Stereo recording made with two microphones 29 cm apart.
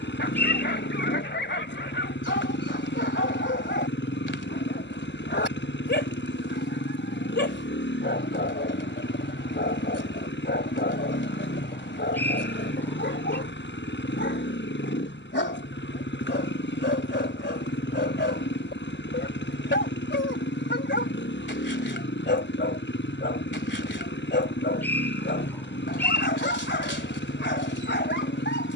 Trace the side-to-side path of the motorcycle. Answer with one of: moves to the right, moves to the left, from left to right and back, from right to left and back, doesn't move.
doesn't move.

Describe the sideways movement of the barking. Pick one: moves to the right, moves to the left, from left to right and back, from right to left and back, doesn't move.
doesn't move.